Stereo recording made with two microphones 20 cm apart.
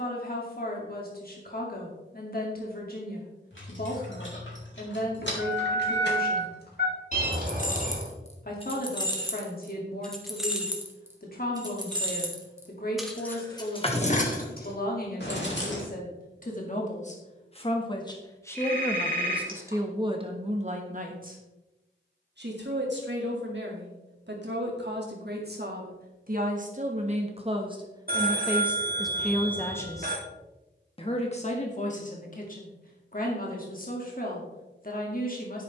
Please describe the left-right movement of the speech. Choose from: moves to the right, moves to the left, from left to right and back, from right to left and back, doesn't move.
from left to right and back.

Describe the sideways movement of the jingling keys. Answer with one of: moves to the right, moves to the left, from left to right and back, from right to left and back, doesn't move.
from left to right and back.